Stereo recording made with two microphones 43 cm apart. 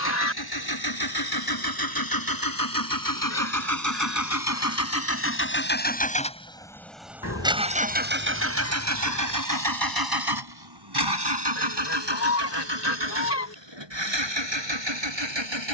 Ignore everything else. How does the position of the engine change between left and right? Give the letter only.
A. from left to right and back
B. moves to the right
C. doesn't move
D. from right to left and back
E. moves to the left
B.